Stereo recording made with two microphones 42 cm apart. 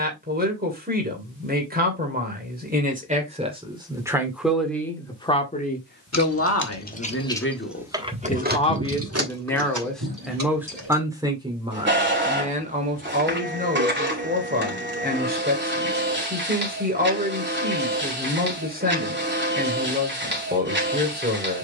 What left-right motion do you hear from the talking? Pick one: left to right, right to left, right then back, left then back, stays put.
left then back.